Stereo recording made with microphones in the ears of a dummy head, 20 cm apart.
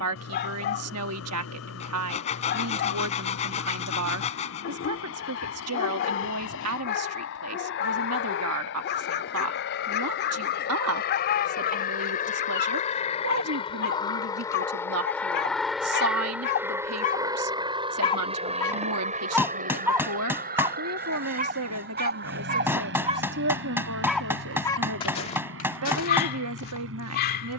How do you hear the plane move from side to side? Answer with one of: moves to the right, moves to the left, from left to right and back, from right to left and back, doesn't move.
moves to the right.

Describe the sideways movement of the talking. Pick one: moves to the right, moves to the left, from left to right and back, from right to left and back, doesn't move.
doesn't move.